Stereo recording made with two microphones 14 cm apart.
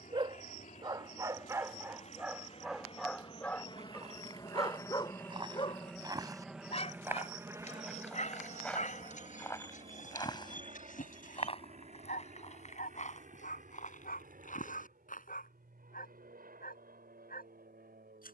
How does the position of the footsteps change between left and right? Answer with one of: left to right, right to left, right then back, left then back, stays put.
right to left.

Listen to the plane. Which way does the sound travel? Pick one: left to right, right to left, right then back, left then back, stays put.
left to right.